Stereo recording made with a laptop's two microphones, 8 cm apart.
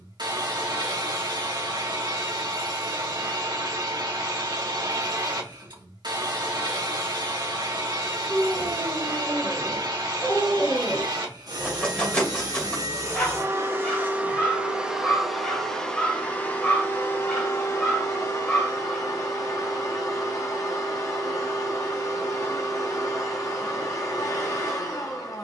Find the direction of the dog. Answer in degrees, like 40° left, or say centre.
10° left.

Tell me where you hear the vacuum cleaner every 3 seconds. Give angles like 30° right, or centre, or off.
70° right, 70° right, 70° right, 60° right, 30° right, 20° left, 50° left, 50° left, 50° left.